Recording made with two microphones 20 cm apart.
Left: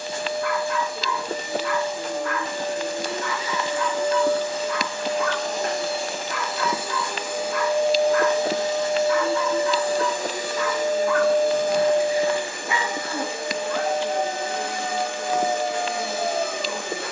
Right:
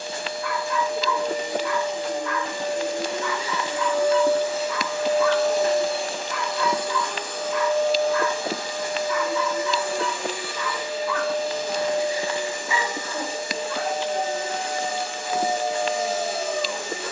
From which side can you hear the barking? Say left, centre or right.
left.